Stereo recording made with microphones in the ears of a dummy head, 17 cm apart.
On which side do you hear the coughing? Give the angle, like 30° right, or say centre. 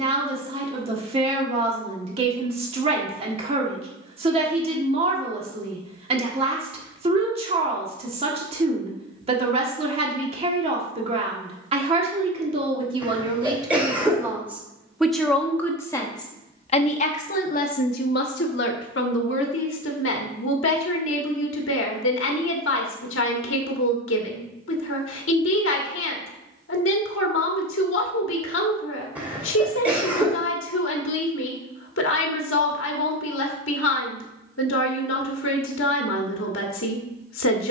10° right.